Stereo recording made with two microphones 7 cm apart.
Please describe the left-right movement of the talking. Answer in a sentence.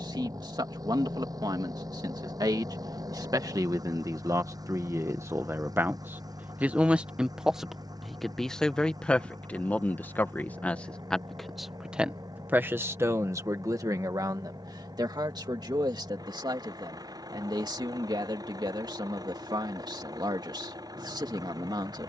You can hear the talking move from right to left and back again.